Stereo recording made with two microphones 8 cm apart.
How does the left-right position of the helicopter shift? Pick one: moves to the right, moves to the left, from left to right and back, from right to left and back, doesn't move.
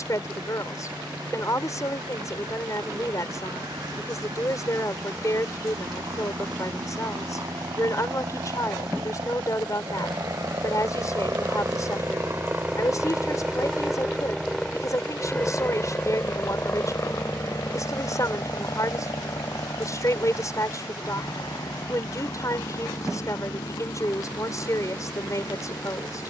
moves to the left.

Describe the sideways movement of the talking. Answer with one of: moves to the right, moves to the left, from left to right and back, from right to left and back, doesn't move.
doesn't move.